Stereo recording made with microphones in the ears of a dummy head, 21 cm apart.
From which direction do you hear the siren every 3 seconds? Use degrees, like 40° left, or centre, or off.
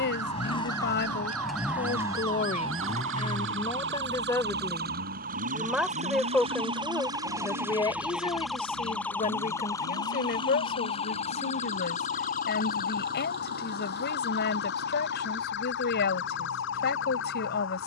60° right, 40° right, 10° right, 20° left, 40° left, 50° left.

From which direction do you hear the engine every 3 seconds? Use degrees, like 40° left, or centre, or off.
centre, 50° right, 60° right, 70° right, 70° right, 80° right.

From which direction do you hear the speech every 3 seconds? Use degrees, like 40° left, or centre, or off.
40° left, 10° left, 10° left, 40° left, 40° left, 40° left.